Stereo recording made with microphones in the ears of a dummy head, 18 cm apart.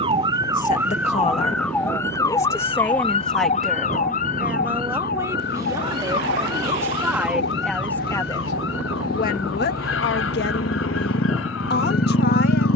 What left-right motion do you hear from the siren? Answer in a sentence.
In this clip you hear the siren travel towards the left.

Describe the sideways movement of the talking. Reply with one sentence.
In this clip you hear the talking move from left to right and back again.